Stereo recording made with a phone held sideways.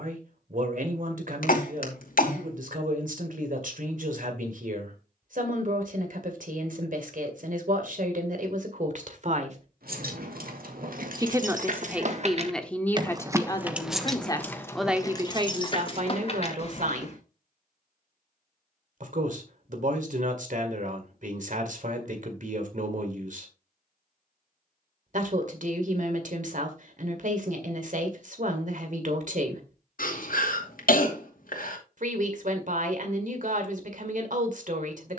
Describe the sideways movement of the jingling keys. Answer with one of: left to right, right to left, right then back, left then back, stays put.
right to left.